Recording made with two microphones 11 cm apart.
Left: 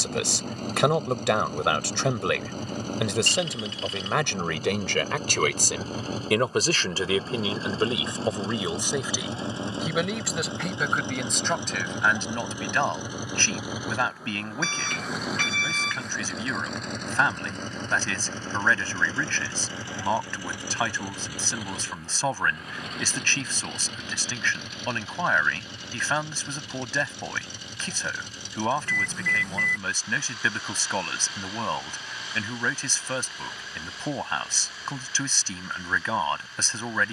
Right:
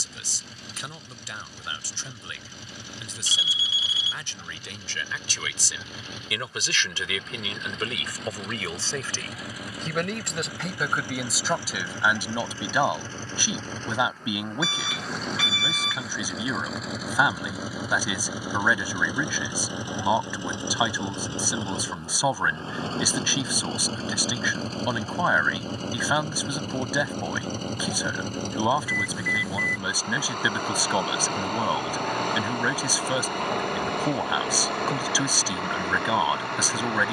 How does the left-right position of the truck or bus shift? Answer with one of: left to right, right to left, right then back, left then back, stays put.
left to right.